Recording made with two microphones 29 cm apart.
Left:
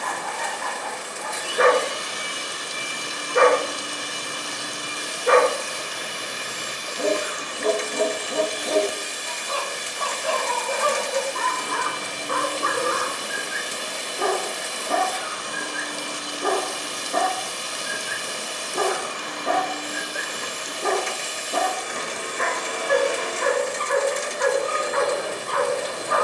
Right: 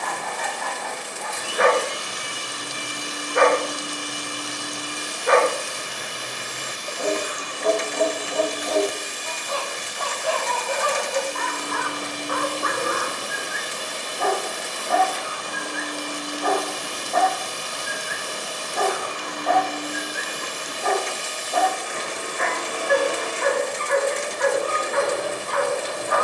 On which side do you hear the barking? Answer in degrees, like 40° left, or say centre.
40° left.